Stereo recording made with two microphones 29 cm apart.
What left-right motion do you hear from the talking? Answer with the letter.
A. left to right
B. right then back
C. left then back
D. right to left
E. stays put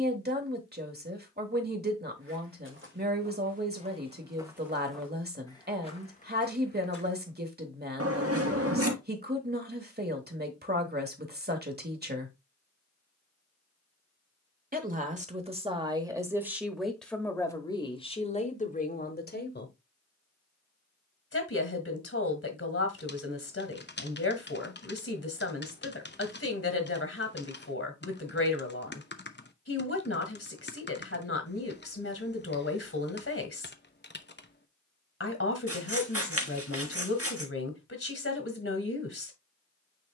D.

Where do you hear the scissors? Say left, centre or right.
right.